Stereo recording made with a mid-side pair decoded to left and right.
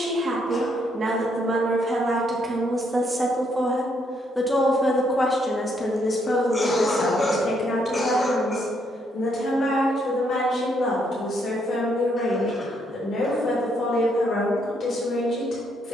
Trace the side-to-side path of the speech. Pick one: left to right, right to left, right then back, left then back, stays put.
right to left.